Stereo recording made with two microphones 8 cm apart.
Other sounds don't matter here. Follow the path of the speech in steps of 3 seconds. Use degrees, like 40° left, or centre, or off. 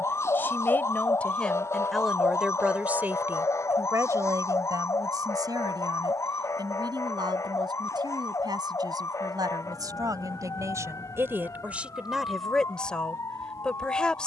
10° left, 50° right, 70° right, 50° right, 10° left.